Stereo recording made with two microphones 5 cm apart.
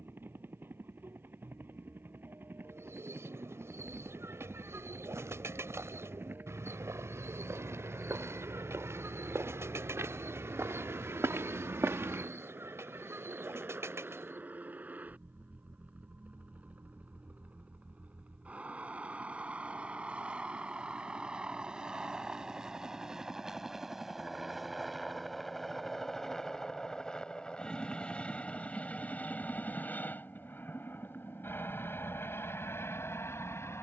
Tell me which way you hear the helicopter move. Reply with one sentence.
You can hear the helicopter go from the right side to the left.